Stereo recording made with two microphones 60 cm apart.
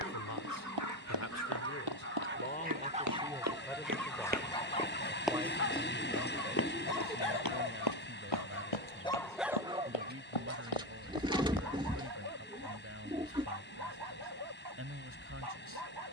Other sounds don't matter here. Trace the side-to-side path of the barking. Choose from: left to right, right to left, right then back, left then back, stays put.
left then back.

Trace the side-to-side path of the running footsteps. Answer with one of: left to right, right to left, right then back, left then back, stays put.
right to left.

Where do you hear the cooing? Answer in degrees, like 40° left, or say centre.
10° right.